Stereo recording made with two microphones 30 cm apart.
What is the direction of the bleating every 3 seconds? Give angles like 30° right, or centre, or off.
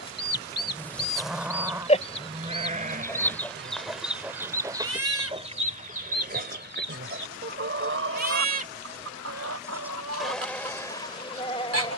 centre, 40° right, 40° right, 10° left.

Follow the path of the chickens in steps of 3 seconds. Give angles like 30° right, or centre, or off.
30° left, 10° right, 40° right, 60° right.